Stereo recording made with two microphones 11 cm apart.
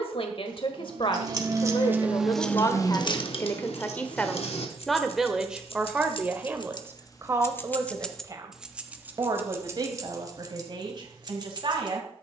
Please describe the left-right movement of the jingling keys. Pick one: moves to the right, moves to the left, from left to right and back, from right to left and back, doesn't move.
from right to left and back.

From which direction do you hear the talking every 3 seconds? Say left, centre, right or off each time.
left, centre, right, right.